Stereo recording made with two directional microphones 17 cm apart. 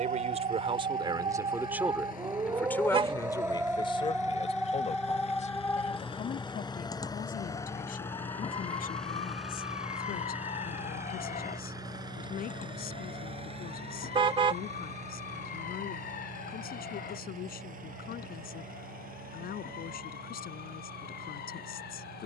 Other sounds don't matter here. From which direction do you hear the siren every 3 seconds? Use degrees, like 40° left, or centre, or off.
30° right, centre, 30° left, 40° left, 50° left, 60° left, 60° left, 60° left.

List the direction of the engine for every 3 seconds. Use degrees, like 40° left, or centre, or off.
60° left, 40° left, 20° left, 10° right, 30° right, 50° right, 60° right, 60° right.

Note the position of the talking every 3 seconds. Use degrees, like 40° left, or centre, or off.
20° right, 30° left, 50° left, 60° left, 60° left, 60° left, 60° left, 60° left.